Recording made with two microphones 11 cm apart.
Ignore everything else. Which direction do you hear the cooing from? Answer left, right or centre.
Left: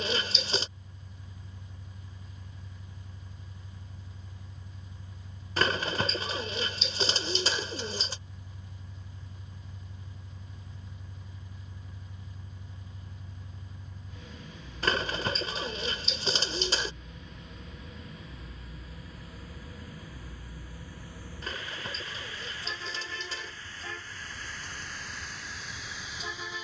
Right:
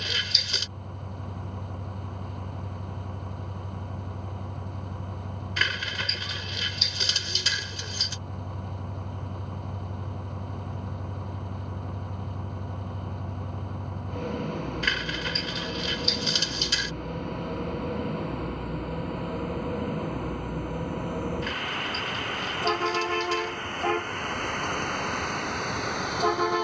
left.